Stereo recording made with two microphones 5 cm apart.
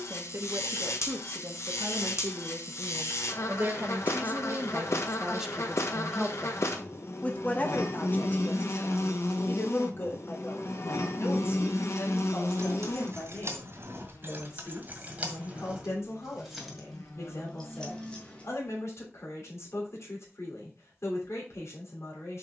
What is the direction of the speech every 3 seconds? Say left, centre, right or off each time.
right, right, left, left, left, left, left, left.